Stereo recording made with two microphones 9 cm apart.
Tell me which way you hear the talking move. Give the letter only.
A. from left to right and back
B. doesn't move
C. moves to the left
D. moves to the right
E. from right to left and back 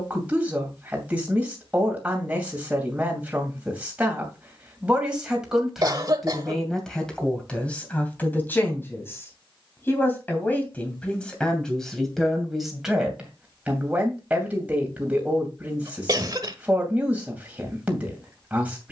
E.